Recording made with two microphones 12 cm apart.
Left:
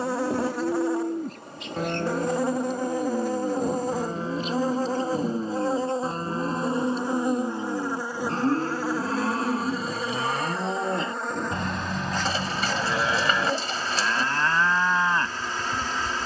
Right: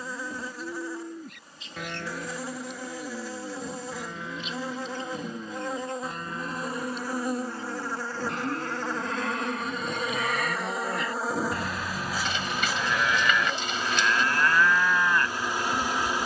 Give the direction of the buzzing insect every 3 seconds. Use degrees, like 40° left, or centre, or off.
60° left, 40° left, 20° left, centre, 10° right, 10° right.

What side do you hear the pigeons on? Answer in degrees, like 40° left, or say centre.
40° left.